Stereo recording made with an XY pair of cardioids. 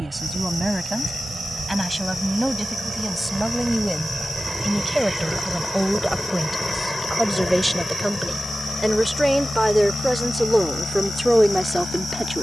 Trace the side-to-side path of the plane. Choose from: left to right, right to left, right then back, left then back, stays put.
right to left.